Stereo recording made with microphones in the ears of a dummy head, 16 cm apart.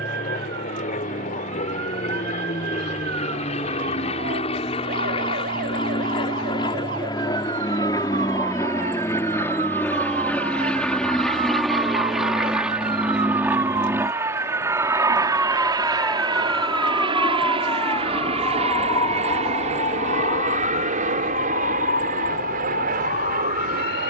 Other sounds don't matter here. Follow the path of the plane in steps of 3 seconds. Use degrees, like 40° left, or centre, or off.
50° left, 40° left, 20° left, 10° left, 10° right, 30° right, 40° right, 50° right.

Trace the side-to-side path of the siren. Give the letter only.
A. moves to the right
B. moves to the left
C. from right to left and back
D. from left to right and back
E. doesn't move
B.